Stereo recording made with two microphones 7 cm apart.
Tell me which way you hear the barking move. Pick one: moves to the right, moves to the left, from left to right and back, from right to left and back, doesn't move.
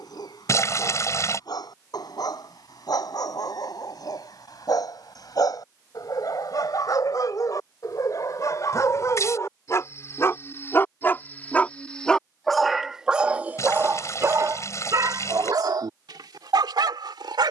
moves to the right.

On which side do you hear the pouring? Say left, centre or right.
left.